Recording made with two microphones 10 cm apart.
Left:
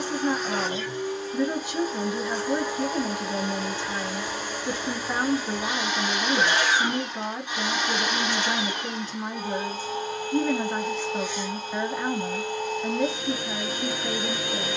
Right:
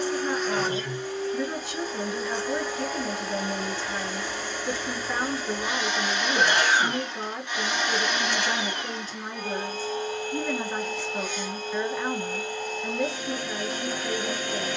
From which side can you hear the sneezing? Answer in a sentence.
You can hear the sneezing on the right.